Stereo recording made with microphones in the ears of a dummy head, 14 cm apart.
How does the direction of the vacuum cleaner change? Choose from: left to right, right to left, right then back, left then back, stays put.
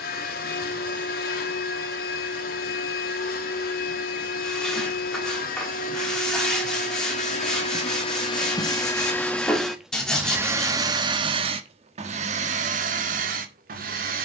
left to right.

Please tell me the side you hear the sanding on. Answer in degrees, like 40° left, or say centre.
centre.